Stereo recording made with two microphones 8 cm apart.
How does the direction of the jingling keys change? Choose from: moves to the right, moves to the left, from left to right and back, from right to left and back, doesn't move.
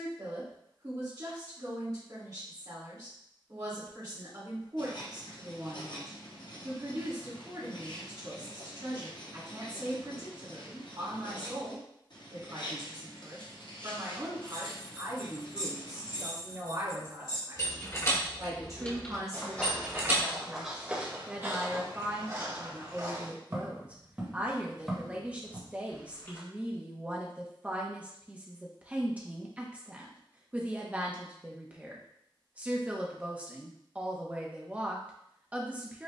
moves to the right.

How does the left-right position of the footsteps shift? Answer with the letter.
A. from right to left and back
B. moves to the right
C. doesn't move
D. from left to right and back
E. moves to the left
D.